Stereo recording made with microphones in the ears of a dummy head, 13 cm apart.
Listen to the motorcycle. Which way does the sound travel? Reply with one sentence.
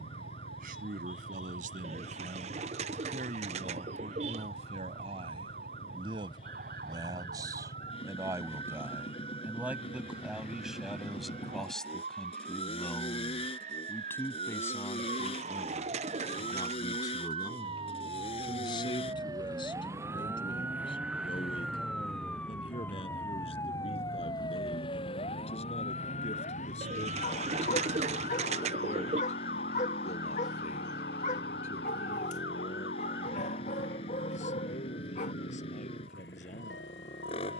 You can hear the motorcycle stay put.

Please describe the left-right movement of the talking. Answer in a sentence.
In this clip you hear the talking move from right to left.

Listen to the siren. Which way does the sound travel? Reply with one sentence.
You can hear the siren move to the left.